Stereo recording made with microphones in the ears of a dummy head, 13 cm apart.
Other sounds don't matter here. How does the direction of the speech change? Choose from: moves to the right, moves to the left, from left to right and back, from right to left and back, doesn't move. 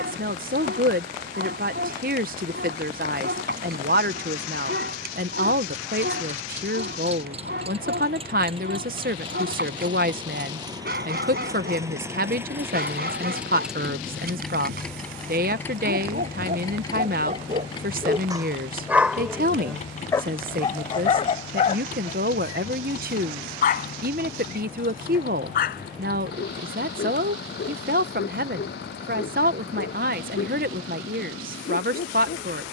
doesn't move.